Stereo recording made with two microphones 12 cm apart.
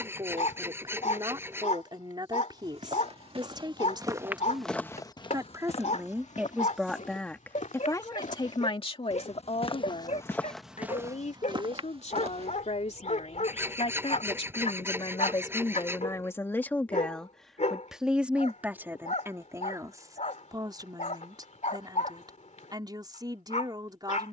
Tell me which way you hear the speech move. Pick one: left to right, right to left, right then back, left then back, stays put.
left then back.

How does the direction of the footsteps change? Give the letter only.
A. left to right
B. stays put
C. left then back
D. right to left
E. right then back
C.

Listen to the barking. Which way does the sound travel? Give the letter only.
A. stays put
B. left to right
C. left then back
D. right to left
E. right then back
A.